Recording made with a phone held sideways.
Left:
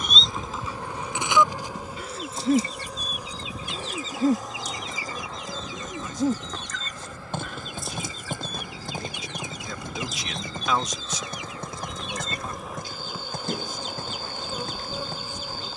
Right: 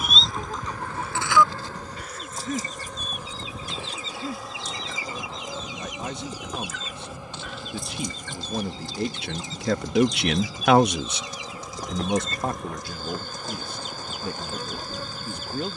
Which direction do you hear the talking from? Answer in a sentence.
In this clip you hear the talking on the right.